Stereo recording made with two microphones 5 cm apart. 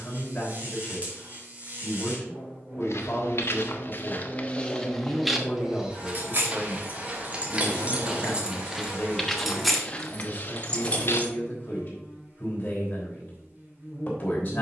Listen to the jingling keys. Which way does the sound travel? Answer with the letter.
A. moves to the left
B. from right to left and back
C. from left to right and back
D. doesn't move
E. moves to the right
A.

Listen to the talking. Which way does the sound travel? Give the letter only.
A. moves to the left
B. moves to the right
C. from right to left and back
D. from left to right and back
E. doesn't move
E.